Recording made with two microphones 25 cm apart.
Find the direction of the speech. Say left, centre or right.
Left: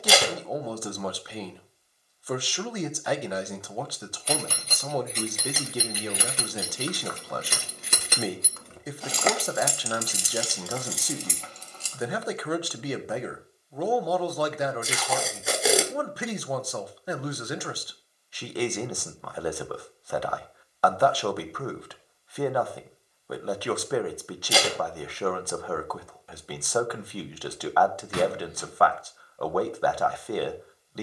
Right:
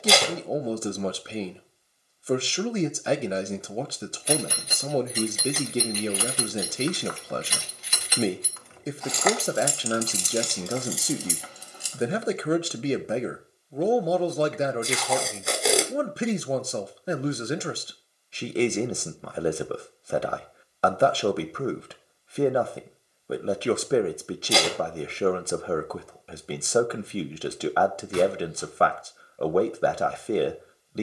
right.